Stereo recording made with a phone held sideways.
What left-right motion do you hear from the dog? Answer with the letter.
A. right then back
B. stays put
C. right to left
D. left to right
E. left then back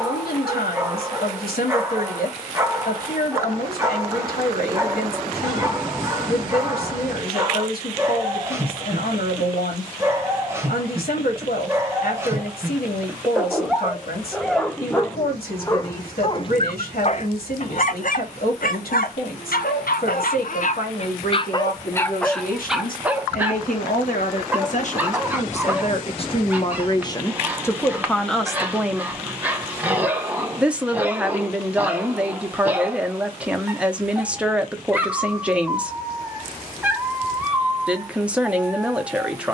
E.